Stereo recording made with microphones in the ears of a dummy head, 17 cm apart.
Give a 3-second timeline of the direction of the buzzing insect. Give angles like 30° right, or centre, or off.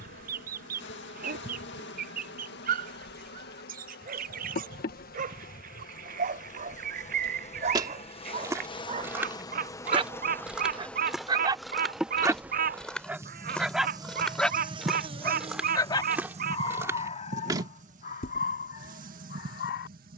60° left, 50° left, 40° left, 10° left, 20° right, 40° right, 50° right.